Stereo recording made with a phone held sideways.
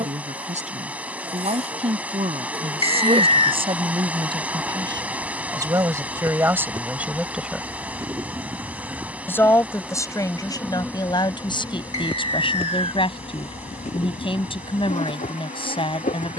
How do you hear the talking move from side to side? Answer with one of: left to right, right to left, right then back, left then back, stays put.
right to left.